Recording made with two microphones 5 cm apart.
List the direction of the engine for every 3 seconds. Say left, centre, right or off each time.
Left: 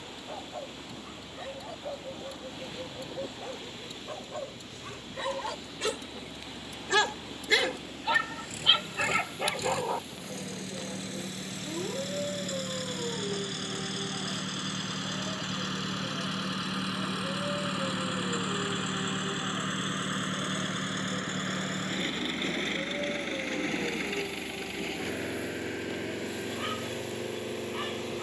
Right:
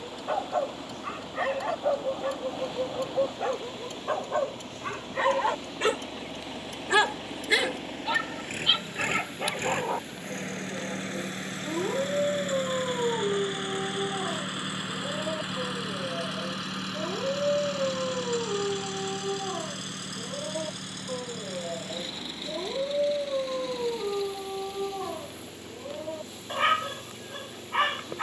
right, right, right, right, right, centre, left, left, left, left.